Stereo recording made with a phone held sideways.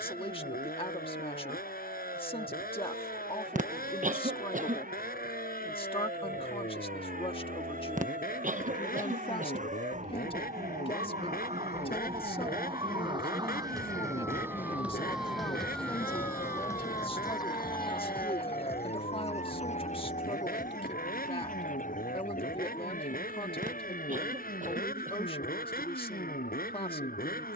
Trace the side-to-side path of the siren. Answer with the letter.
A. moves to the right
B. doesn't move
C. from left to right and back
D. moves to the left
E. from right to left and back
D.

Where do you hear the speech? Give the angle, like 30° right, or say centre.
40° left.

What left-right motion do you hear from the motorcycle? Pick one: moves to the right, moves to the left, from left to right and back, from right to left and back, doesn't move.
doesn't move.